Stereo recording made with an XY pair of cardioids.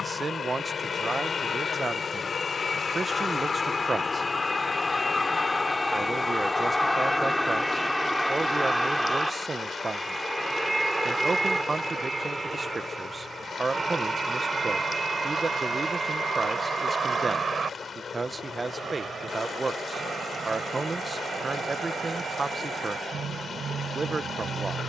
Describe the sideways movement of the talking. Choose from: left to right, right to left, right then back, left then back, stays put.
stays put.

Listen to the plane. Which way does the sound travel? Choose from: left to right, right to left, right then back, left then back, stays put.
left to right.